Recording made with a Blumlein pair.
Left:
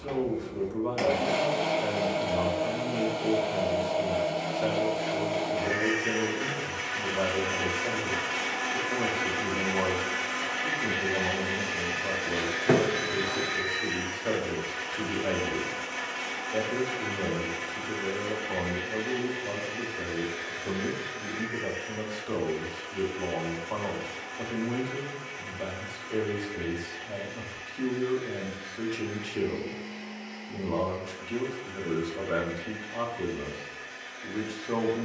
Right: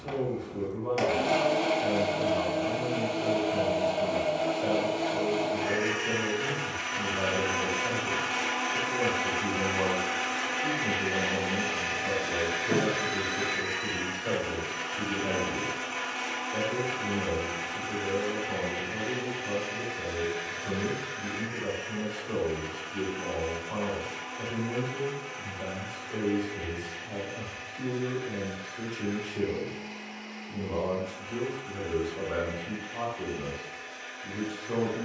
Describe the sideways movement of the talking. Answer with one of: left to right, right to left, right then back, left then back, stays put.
stays put.